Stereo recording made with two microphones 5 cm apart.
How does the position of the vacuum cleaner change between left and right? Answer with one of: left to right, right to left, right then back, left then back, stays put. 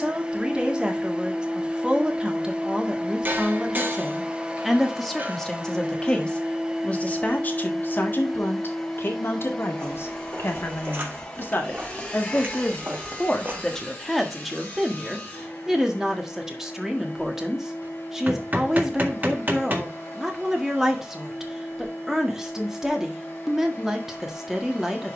right to left.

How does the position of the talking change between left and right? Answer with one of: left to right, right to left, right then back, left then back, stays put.
left then back.